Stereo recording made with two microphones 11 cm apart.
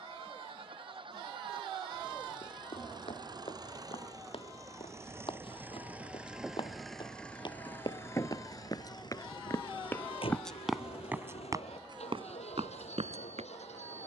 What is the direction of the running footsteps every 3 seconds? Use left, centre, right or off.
left, left, left, centre, right.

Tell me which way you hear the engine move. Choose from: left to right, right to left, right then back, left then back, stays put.
right to left.